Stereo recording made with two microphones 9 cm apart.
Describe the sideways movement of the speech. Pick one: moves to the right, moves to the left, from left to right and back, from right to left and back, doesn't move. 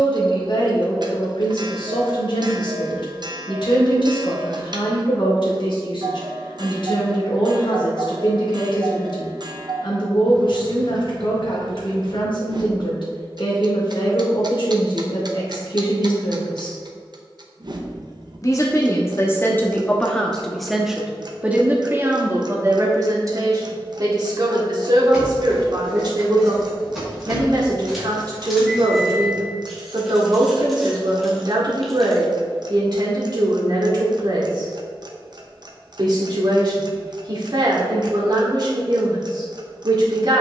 moves to the right.